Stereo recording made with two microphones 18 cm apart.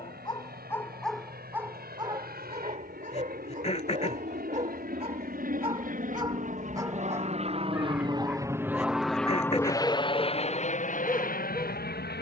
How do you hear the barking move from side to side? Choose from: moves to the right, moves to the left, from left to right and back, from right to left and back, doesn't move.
from left to right and back.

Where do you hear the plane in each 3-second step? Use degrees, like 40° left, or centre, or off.
70° right, 70° right, 40° right, 30° left.